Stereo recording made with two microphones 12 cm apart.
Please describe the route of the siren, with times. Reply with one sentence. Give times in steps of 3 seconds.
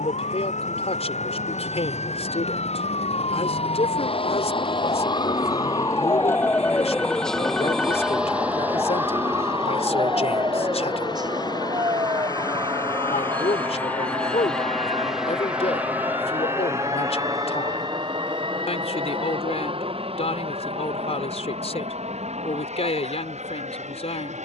You can hear the siren on the left from 0 s, in the centre from 6 s and on the right from 9 s.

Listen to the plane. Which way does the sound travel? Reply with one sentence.
In this clip you hear the plane travel towards the right.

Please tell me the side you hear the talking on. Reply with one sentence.
In this clip you hear the talking on the left.